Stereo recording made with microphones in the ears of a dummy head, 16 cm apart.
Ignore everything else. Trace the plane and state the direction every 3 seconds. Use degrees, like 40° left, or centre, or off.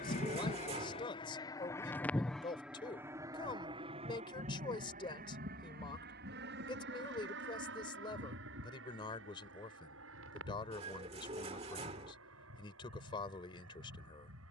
20° left, 40° right, 60° right, 70° right, 70° right.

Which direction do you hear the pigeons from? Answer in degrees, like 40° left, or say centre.
30° right.